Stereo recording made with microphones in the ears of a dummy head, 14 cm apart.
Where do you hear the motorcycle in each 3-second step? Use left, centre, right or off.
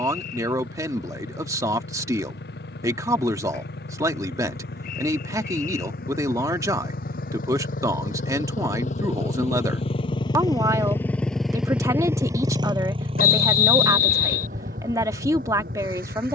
left, left, left, left, right, right.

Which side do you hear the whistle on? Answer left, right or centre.
left.